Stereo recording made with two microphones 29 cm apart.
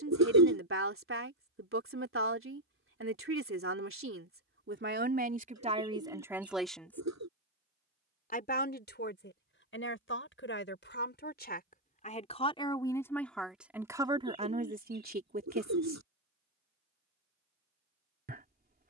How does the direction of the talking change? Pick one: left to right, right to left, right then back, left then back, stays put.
left then back.